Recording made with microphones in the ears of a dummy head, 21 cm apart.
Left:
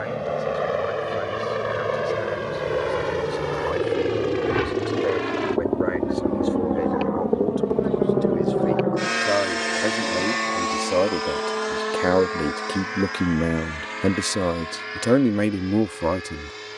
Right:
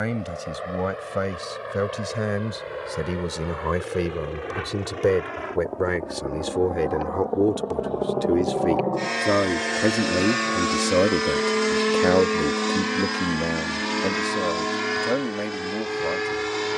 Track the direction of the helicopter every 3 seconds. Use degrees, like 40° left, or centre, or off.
70° left, 60° left, 40° left, 10° right, 50° right, 70° right.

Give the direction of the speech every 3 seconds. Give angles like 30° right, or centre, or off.
60° right, 60° right, 50° right, 20° right, 30° left, 60° left.